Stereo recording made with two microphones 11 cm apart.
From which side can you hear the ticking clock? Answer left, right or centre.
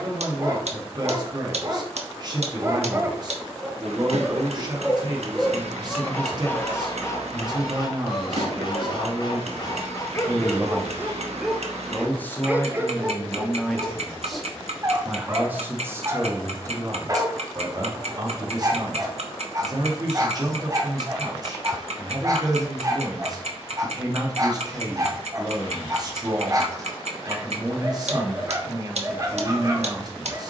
right.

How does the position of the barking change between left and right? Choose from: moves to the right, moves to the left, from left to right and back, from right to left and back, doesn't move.
from right to left and back.